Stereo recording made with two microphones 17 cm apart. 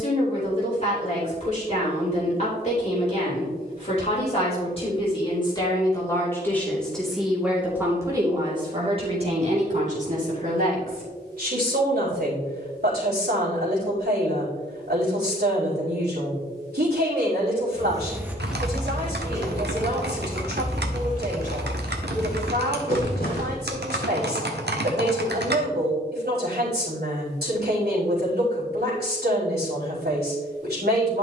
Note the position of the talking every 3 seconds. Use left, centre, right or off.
left, left, centre, right, right, right, right, right, right, right, right.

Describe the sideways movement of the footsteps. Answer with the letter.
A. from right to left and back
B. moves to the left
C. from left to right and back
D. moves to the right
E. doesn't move
B.